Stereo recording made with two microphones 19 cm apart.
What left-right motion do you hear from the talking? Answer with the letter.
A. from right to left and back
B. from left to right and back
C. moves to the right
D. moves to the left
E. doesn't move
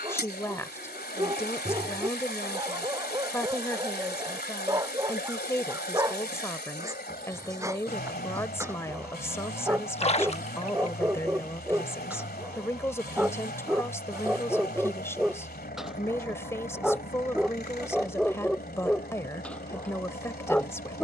E.